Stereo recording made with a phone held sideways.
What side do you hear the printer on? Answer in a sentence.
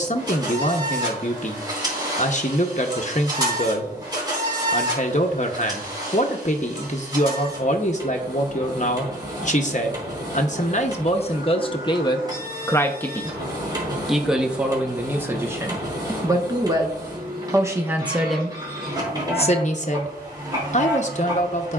You can hear the printer on the right.